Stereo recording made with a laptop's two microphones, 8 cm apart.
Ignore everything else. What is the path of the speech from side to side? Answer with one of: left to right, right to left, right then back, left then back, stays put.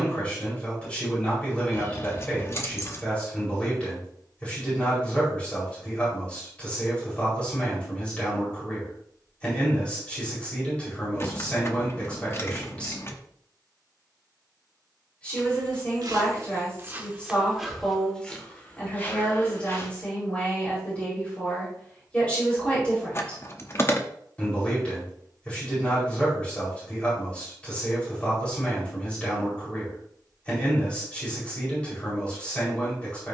stays put.